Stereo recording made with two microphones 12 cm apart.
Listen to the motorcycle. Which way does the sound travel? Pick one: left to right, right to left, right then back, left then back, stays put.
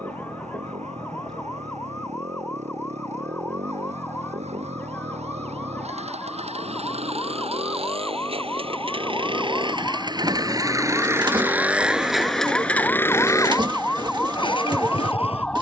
right to left.